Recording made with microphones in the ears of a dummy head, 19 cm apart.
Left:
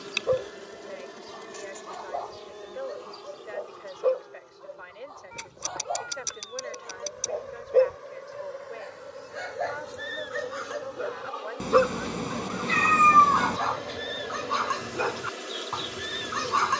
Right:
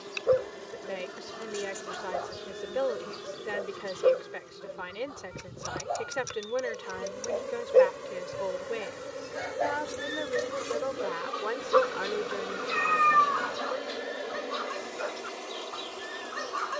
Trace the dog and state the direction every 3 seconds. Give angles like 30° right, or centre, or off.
20° right, 20° right, 10° right, 10° left, 70° left, 80° left.